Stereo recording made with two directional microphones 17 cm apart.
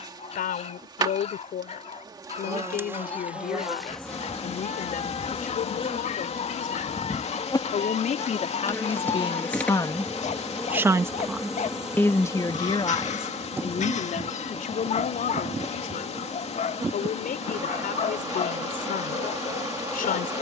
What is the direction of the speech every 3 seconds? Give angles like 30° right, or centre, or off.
60° left, 60° left, 50° left, 10° left, 30° left, 60° left, 60° left.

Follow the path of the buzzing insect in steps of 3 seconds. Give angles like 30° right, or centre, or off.
20° right, 10° left, 20° left, centre, 10° right, 20° right, 20° right.